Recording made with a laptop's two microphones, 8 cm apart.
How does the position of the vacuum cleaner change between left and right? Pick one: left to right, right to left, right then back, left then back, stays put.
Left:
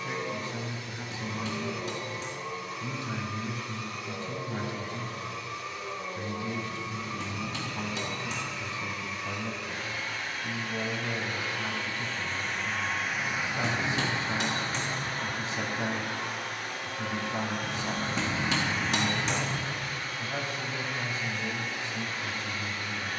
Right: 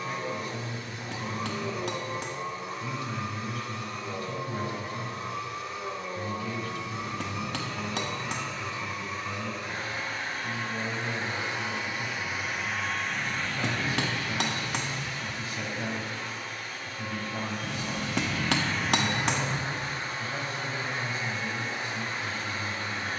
left then back.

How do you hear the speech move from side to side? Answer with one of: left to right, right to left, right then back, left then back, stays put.
stays put.